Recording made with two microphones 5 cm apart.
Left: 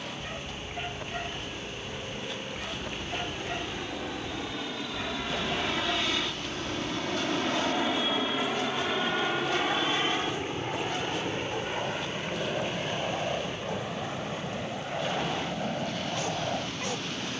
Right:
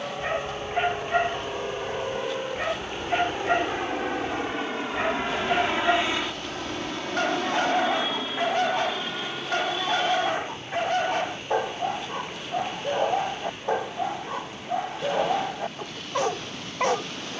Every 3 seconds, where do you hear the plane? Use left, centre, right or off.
right, right, centre, left, left, left.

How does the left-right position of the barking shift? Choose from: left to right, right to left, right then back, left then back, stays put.
stays put.